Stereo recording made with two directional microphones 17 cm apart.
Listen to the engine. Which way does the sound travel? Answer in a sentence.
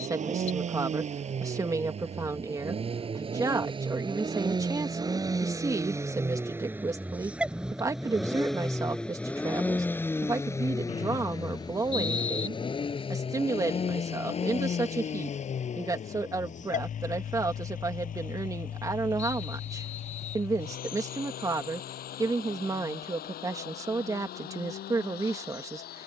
In this clip you hear the engine move to the left.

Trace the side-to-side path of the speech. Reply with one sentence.
In this clip you hear the speech stay in one place.